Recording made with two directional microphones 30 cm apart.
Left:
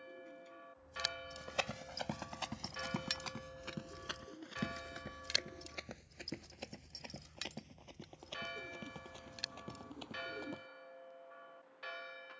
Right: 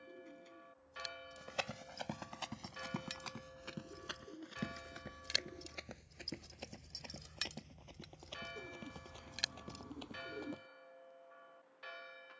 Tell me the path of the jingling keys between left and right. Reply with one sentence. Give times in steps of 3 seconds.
In this clip you hear the jingling keys on the left from 0 s and on the right from 6 s.